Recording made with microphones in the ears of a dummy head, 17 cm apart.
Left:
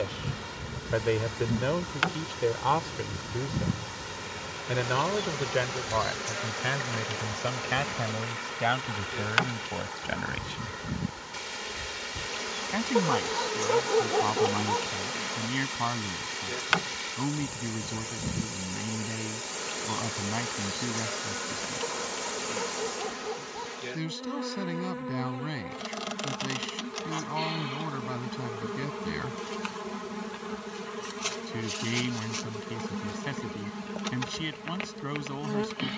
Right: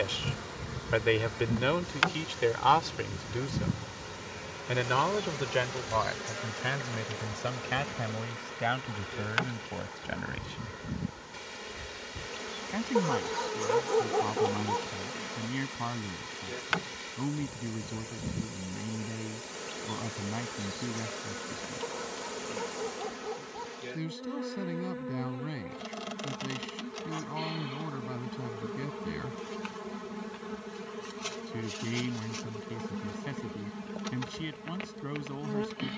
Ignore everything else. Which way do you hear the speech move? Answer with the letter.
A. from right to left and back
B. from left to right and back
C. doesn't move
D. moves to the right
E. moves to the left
E.